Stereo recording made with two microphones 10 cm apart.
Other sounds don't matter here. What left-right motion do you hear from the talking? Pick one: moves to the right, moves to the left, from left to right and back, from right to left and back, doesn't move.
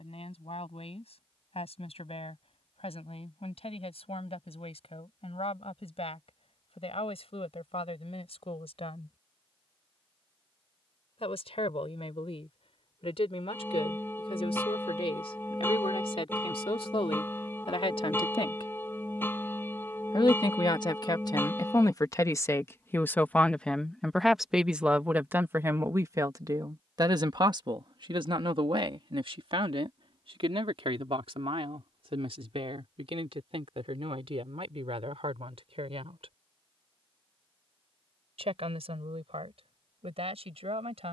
moves to the right.